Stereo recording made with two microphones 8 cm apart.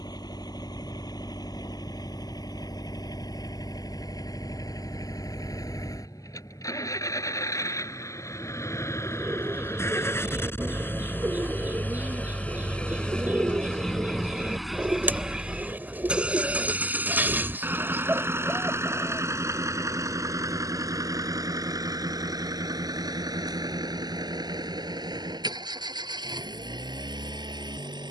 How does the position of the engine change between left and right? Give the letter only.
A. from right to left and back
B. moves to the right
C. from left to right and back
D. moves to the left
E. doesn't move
B.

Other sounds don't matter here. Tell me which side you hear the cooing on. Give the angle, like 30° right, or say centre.
20° right.